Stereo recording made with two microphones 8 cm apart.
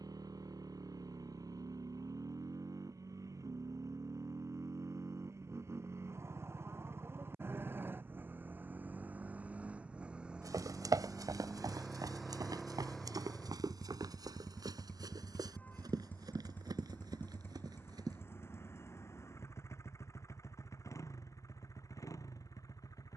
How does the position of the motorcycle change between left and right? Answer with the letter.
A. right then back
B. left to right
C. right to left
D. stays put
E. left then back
C.